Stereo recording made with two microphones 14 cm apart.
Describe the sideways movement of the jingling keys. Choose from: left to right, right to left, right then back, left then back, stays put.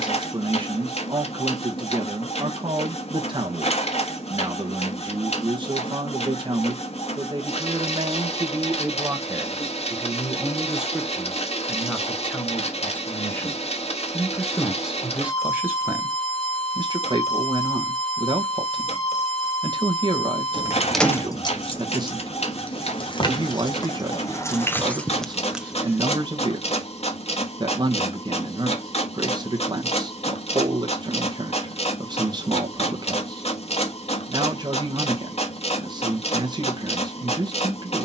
left then back.